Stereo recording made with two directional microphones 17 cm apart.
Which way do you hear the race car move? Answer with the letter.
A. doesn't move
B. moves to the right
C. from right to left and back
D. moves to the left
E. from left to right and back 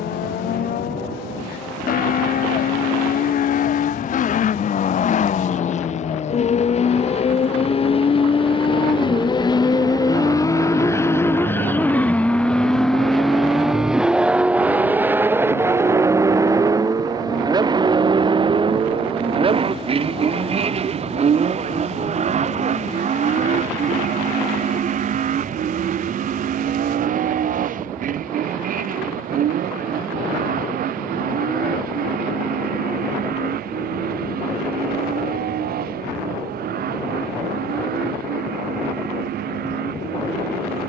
B.